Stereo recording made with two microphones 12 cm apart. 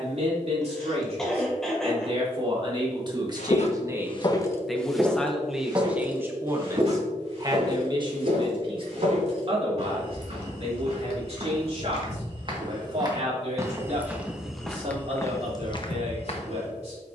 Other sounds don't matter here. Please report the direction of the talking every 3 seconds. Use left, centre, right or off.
right, centre, right, right, right, right.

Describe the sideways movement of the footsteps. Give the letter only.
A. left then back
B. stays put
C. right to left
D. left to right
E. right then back
E.